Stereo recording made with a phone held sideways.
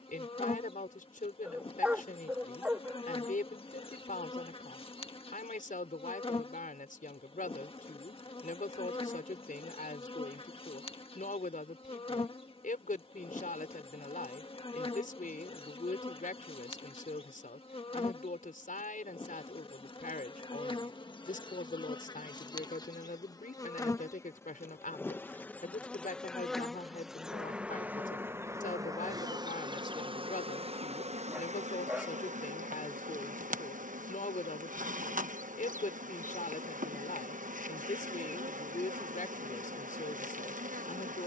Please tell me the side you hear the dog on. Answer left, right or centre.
centre.